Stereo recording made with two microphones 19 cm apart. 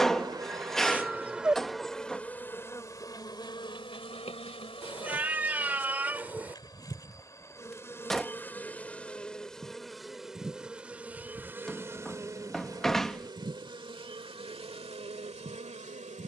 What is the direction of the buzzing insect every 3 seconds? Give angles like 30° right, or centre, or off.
centre, 30° left, 20° left, centre, 20° right, 40° right.